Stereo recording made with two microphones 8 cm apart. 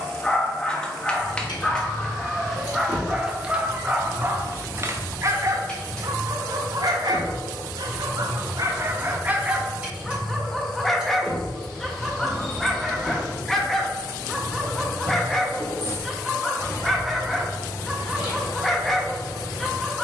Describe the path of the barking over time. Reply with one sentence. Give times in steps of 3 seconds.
You can hear the barking in the centre from 0 s, on the right from 3 s and in the centre from 9 s.